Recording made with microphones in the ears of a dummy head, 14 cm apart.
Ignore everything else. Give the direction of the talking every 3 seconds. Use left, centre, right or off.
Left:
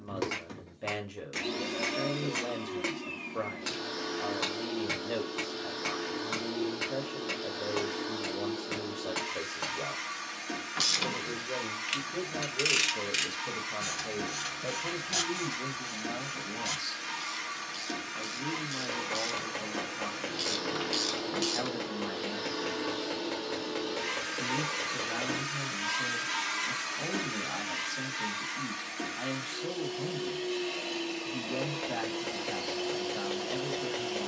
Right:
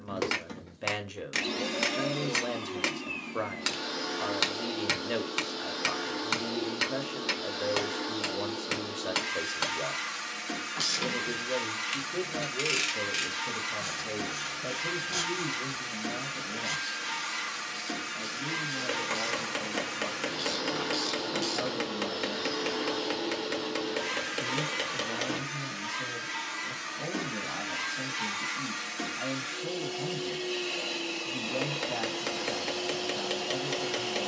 right, right, right, right, centre, left, left, left, left, left, left, left.